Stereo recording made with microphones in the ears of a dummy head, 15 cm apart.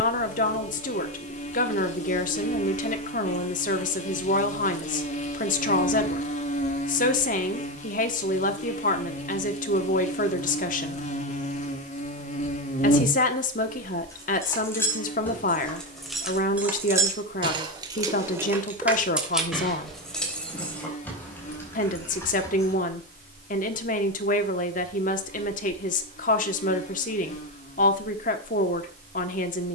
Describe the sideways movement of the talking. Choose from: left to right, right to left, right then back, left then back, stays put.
stays put.